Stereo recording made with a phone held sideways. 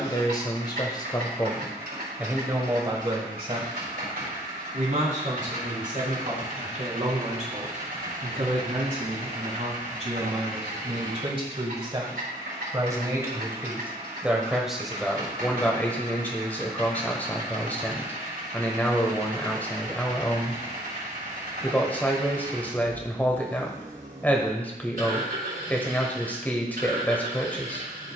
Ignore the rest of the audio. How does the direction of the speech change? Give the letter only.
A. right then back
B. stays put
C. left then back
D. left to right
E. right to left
A.